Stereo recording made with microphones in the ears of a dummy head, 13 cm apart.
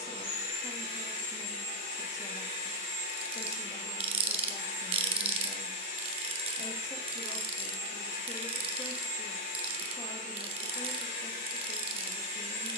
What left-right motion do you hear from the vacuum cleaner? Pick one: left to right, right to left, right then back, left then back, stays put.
stays put.